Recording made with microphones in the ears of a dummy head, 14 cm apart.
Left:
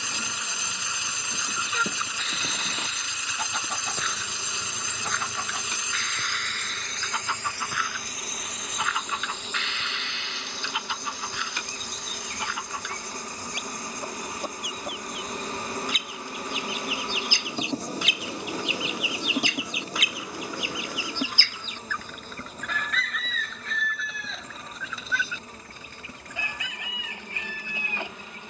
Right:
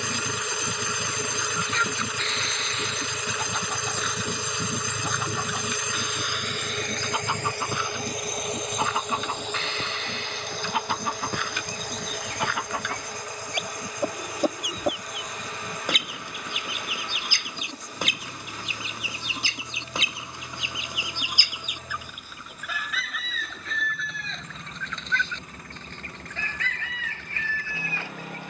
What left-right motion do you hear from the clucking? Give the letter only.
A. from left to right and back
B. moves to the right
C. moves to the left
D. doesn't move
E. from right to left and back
A.